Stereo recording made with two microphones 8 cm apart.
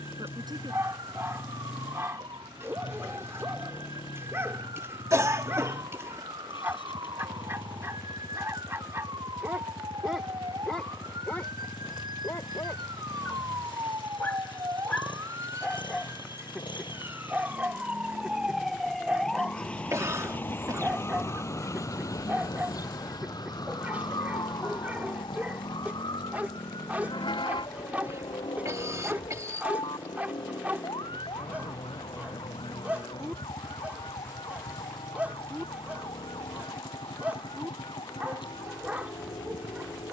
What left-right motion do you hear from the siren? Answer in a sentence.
You can hear the siren go from the right side to the left.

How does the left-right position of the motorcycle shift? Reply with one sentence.
You can hear the motorcycle stay put.